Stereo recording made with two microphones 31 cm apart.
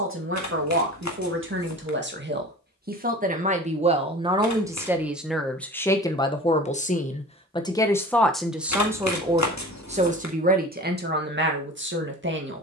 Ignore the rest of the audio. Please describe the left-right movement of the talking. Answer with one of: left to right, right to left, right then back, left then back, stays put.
left then back.